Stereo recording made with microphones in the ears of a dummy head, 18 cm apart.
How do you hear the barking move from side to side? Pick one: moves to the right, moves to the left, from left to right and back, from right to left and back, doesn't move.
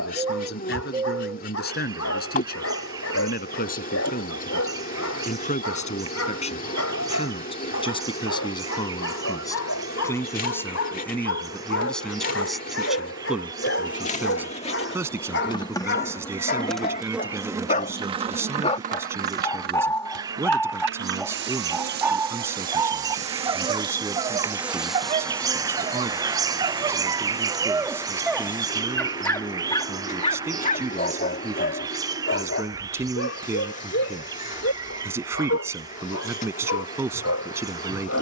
from left to right and back.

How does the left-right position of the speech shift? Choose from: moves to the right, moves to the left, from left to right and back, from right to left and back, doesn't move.
moves to the right.